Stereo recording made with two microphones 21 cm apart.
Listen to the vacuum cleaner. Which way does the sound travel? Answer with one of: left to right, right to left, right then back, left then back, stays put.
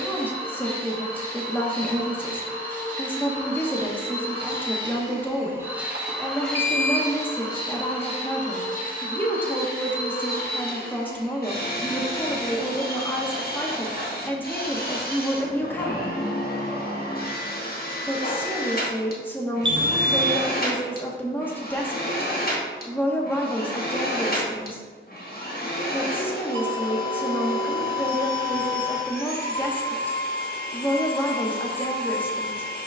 right to left.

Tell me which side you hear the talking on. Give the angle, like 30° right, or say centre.
10° left.